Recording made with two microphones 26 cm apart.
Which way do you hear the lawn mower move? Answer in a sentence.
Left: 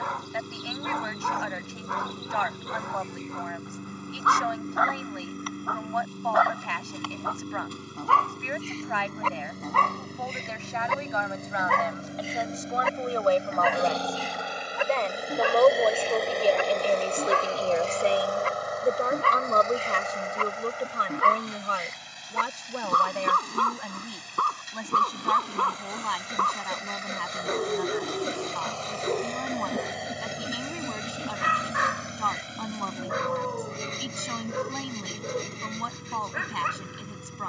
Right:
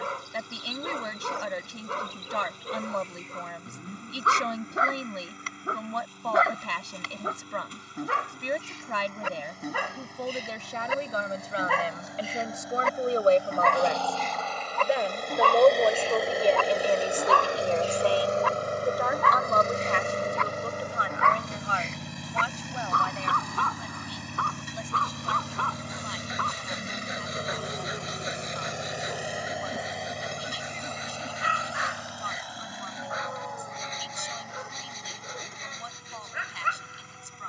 In this clip you hear the lawn mower go right and come back.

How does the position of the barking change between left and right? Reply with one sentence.
In this clip you hear the barking move from right to left.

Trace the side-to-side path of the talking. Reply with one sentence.
You can hear the talking move from right to left.